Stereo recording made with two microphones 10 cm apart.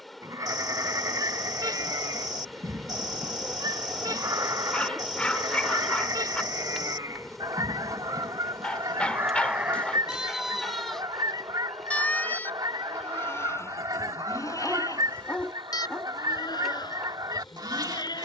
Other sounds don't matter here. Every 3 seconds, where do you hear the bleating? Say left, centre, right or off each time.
right, right, right, centre, left, left.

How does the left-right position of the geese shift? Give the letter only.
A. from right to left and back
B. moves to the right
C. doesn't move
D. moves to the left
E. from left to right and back
C.